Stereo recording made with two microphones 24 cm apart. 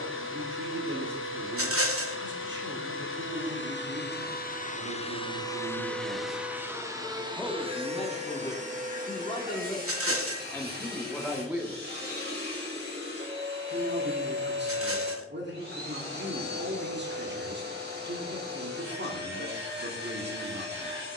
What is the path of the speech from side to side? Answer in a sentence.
In this clip you hear the speech go left and come back.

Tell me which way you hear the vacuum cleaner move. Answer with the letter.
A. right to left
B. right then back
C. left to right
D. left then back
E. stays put
C.